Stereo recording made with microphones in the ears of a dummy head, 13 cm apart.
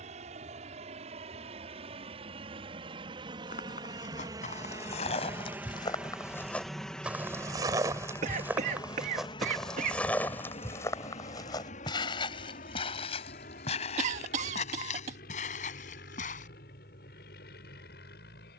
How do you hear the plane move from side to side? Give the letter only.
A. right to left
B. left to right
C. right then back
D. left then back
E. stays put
A.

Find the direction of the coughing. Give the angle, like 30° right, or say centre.
50° right.